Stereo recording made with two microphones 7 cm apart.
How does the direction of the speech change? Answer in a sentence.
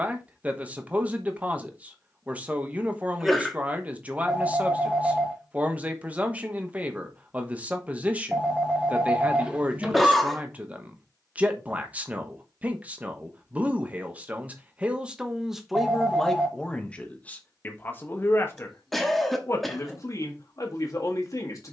You can hear the speech go from the right side to the left.